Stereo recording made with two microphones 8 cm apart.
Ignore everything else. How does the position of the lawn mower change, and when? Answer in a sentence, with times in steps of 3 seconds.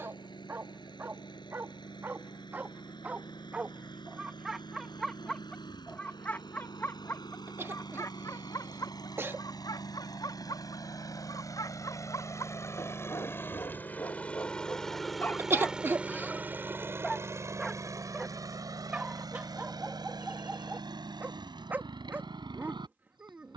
You can hear the lawn mower on the left from 0 s and on the right from 15 s.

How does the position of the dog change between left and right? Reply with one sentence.
In this clip you hear the dog go left and come back.